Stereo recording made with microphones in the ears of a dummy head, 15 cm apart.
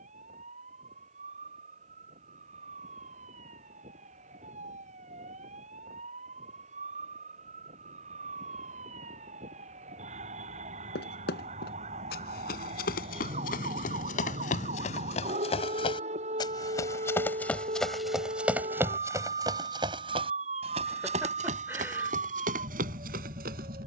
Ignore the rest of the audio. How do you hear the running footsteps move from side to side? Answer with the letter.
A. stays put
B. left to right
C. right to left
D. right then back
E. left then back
B.